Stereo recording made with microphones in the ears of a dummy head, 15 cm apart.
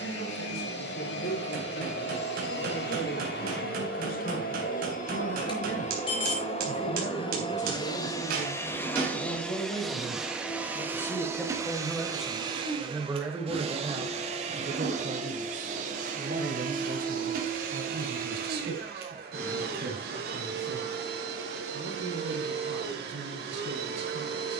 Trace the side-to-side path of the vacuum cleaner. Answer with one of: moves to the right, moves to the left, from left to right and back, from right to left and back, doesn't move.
moves to the right.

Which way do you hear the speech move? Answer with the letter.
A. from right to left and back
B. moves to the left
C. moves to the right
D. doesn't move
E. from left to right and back
C.